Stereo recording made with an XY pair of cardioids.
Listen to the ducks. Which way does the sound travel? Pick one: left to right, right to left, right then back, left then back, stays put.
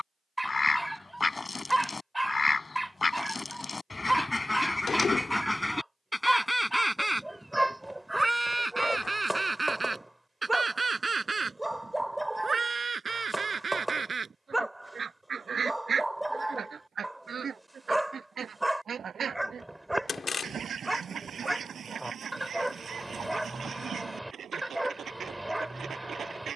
left to right.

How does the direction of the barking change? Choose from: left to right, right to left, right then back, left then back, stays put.
stays put.